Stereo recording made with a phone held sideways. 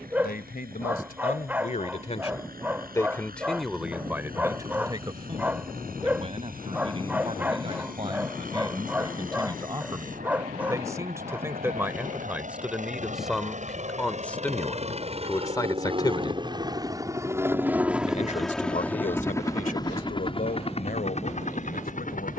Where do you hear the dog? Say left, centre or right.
centre.